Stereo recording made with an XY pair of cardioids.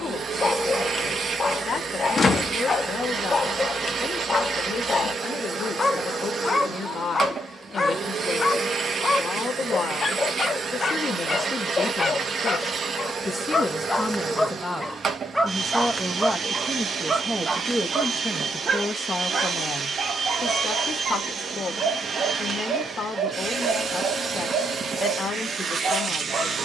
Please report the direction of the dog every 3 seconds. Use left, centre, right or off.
left, left, left, left, left, right, right, right, right.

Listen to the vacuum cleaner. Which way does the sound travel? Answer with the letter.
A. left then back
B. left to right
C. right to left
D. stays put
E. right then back
D.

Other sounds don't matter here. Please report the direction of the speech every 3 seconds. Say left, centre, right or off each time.
left, left, left, left, left, centre, left, left, left.